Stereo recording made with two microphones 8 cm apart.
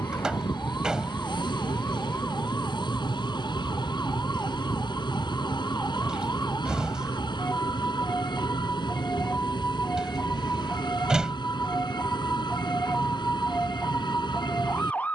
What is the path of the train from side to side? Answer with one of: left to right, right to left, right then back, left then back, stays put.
stays put.